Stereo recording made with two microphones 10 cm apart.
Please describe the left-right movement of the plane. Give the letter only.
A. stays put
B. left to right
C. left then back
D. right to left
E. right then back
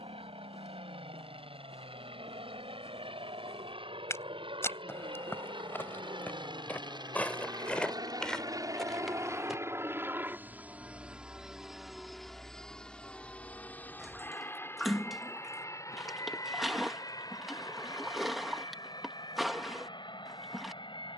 D.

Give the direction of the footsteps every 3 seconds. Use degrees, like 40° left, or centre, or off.
30° left, 20° left, 10° left, centre, off, off, off.